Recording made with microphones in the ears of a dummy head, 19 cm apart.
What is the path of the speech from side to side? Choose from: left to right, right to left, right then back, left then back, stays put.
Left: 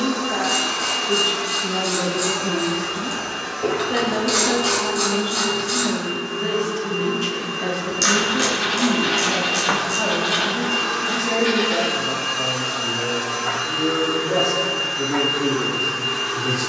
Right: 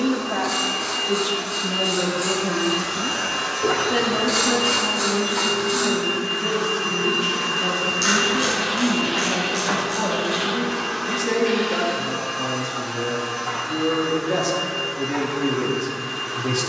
left then back.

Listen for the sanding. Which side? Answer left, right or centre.
left.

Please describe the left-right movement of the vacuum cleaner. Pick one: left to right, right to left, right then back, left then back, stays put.
right then back.